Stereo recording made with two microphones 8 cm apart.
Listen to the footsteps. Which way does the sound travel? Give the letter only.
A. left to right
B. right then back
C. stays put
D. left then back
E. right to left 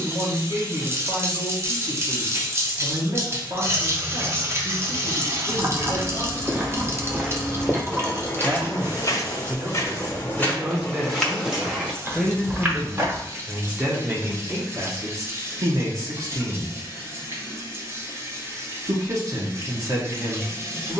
D.